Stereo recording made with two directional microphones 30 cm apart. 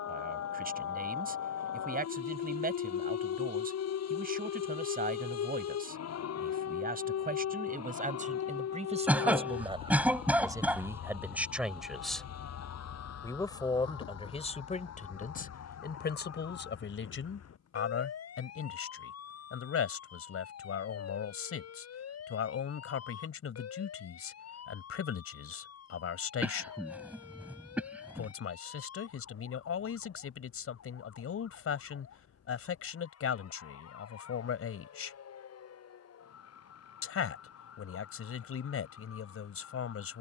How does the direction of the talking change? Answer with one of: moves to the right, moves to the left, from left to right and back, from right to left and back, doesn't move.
moves to the left.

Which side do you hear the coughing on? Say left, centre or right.
centre.